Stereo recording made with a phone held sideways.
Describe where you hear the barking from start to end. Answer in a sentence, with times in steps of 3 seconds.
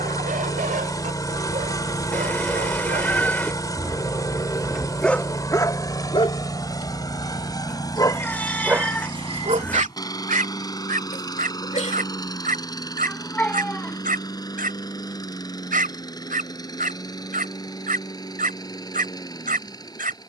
You can hear the barking on the right from 0 s, in the centre from 3 s, on the left from 6 s and on the right from 9 s.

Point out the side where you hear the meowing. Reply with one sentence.
You can hear the meowing in the centre.